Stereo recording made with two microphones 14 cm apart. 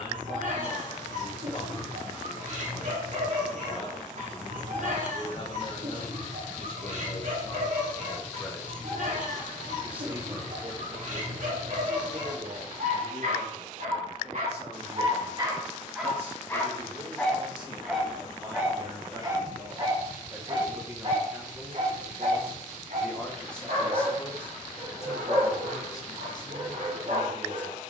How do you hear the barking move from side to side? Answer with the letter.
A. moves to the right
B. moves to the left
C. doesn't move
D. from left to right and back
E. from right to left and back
E.